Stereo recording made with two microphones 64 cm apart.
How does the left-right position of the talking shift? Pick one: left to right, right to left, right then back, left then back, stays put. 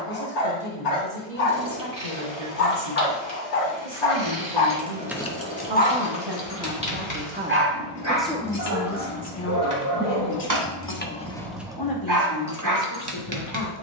right to left.